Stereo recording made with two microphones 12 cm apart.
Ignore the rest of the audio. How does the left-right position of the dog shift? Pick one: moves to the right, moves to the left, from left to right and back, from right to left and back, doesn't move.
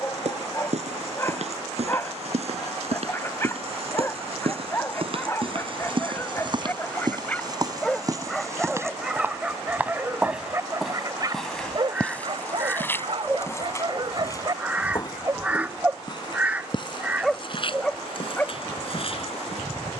from left to right and back.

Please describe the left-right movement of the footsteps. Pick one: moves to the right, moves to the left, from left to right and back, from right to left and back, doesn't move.
moves to the left.